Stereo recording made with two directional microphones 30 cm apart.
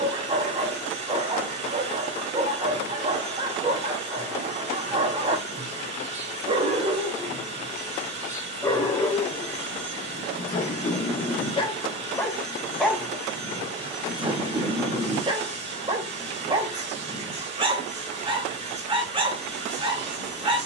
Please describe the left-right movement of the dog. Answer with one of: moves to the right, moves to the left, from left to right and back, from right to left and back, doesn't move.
from right to left and back.